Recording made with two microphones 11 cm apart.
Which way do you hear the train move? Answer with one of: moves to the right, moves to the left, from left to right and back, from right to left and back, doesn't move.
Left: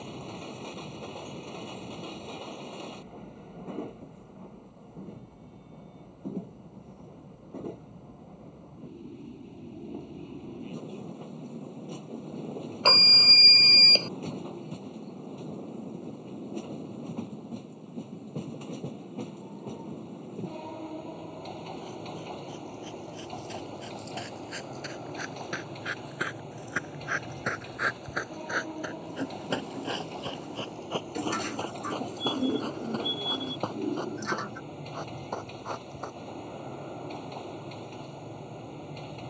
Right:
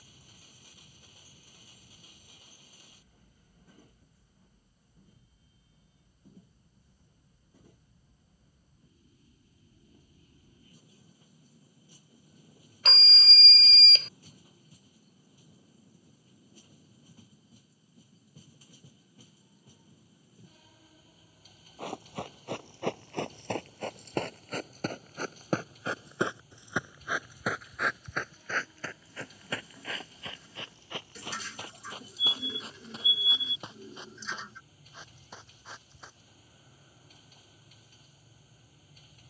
doesn't move.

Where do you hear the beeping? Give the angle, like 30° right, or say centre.
50° left.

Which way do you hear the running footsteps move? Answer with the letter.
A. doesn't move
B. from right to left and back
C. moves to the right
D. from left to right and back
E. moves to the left
E.